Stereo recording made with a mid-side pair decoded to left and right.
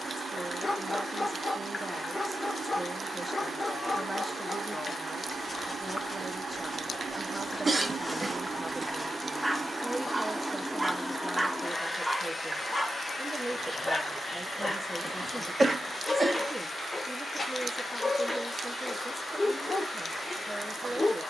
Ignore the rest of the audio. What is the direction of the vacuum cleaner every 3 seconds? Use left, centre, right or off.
right, right, right, centre, left, left, left.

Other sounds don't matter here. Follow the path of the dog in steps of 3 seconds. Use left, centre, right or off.
left, left, centre, centre, left, left, left.